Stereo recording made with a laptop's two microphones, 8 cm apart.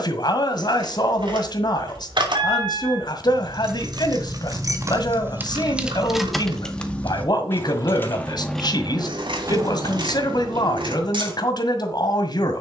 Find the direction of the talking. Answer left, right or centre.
left.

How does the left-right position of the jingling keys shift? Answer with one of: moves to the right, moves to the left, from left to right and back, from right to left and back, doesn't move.
from right to left and back.